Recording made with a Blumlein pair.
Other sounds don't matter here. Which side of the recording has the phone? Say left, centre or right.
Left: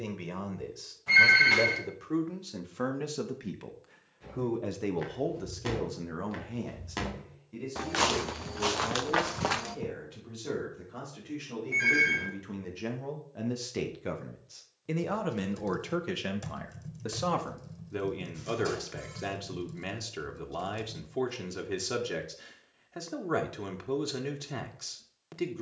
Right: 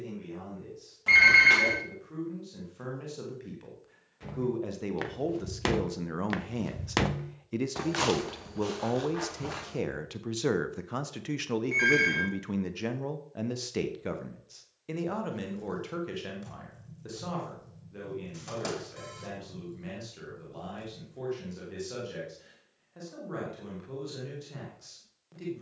right.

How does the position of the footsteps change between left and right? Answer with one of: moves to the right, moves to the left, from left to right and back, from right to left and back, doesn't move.
moves to the left.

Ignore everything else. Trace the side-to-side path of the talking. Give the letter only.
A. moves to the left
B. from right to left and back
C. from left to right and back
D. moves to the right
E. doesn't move
C.